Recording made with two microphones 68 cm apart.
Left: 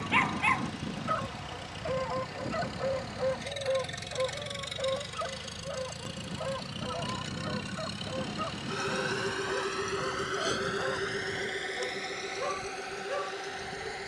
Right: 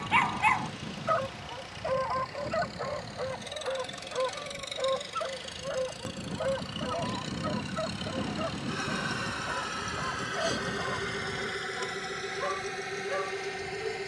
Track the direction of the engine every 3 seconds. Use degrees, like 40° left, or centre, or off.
60° left, 50° left, 10° left, 30° right, 50° right.